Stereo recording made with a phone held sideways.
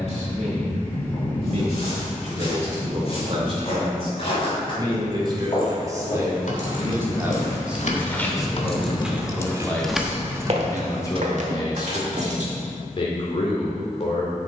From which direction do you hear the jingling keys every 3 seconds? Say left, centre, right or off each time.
off, left, left, centre, right.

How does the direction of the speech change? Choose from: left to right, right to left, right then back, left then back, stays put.
right to left.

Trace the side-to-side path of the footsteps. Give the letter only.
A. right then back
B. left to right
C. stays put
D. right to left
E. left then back
B.